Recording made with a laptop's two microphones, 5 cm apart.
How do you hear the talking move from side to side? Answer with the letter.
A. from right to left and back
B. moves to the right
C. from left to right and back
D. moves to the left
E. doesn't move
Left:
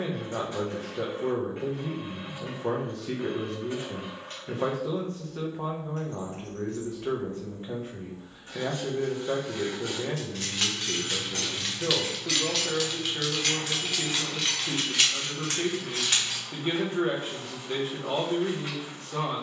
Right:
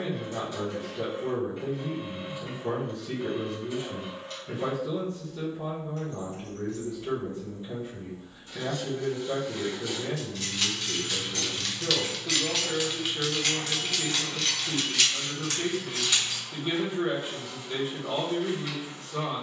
E.